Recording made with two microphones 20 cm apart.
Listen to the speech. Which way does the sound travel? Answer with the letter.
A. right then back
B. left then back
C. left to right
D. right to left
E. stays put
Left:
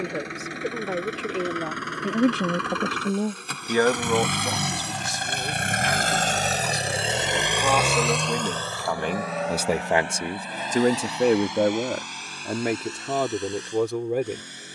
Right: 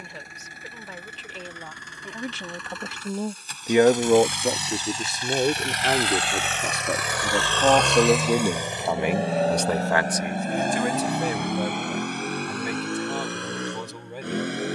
A.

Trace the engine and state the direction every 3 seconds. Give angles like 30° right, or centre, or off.
80° left, 60° left, 10° left, 50° right, 60° right.